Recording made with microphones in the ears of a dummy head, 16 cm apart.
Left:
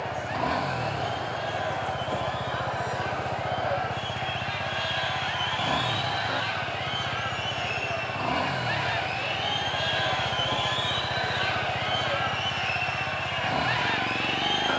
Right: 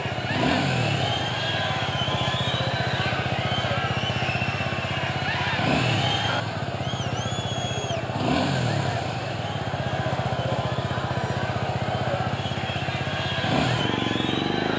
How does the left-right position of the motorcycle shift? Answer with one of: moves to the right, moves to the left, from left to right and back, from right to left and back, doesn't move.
doesn't move.